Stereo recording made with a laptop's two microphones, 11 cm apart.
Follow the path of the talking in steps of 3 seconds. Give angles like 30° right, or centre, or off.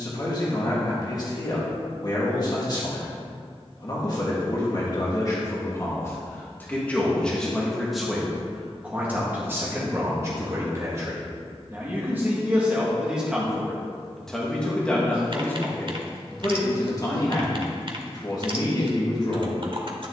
40° left, 30° left, 10° left, 20° right, centre, 30° left, 40° left.